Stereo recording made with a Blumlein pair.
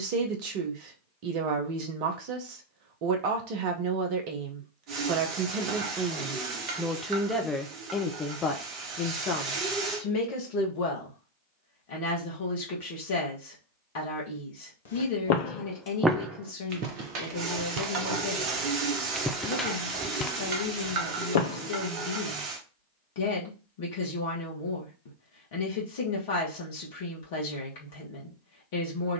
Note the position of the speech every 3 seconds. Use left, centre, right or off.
right, right, centre, left, left, left, left, left, left, left.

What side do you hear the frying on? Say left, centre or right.
right.